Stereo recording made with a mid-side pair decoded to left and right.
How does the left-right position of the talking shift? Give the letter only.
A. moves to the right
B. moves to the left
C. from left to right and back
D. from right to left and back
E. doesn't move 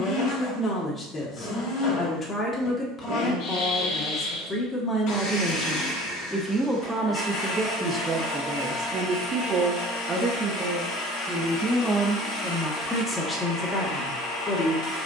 C.